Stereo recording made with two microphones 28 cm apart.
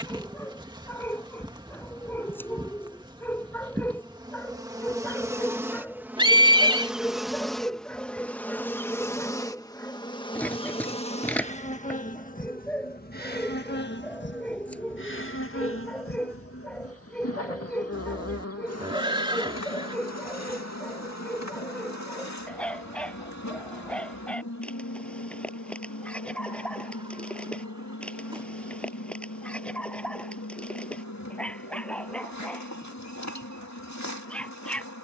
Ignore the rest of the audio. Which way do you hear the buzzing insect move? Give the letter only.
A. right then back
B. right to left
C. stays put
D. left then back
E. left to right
B.